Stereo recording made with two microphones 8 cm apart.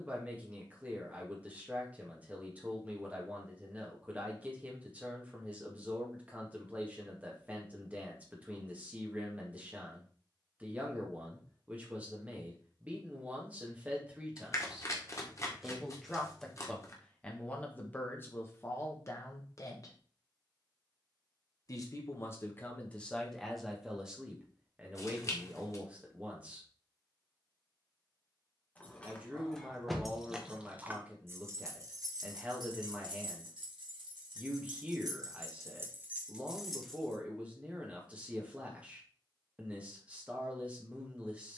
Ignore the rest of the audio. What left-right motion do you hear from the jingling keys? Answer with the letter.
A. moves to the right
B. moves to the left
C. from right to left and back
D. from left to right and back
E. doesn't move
D.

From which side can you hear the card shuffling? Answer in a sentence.
In this clip you hear the card shuffling on the left.